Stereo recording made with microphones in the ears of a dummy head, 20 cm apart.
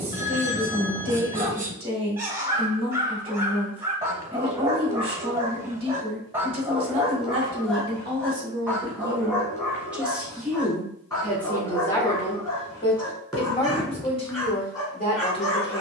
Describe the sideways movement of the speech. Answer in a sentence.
You can hear the speech move to the left.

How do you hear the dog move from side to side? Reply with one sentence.
You can hear the dog travel towards the left.